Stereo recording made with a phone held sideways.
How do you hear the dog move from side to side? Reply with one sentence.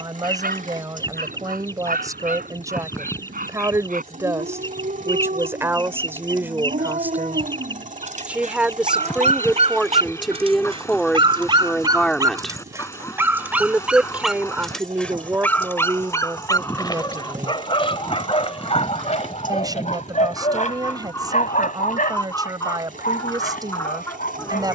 In this clip you hear the dog move from right to left.